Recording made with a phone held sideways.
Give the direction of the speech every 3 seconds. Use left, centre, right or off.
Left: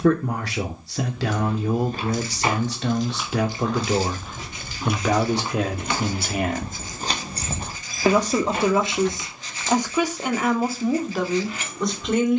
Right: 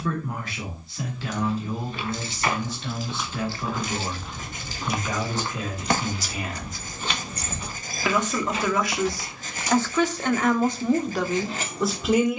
left, left, left, centre.